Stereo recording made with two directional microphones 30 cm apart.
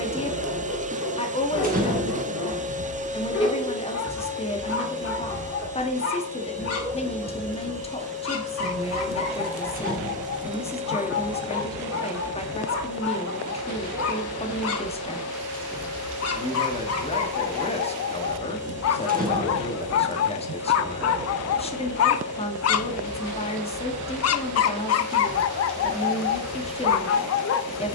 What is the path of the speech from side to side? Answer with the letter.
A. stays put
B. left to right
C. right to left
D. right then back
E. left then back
A.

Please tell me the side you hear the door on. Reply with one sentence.
You can hear the door on the right.